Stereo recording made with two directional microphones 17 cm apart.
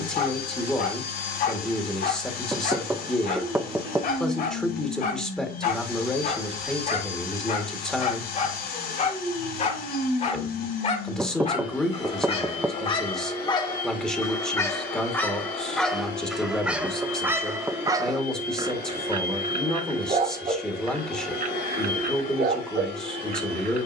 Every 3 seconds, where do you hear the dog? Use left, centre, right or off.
left, left, left, left, left, centre, right, right.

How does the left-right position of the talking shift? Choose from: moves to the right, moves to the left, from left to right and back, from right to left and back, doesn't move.
doesn't move.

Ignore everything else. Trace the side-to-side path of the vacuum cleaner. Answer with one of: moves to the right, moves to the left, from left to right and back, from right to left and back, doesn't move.
doesn't move.